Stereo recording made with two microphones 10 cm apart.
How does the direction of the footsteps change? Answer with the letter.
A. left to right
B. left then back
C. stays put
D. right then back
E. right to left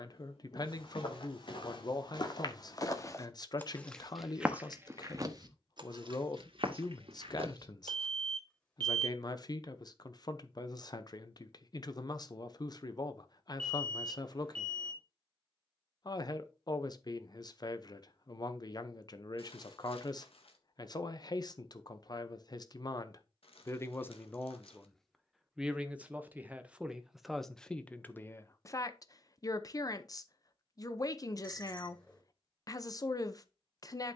A.